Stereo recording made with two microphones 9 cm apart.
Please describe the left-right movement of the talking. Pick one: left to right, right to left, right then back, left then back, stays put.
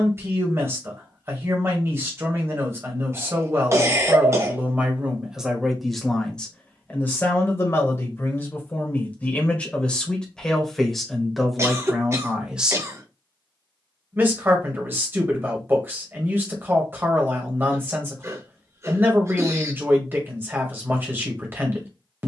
left then back.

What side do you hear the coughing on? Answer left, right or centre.
right.